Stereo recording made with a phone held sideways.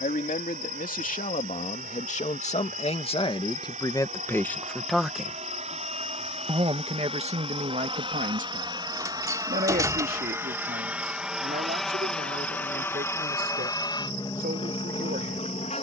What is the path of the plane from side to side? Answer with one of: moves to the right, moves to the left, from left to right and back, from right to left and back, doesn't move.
moves to the left.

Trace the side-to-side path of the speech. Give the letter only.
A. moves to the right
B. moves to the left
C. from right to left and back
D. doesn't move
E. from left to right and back
A.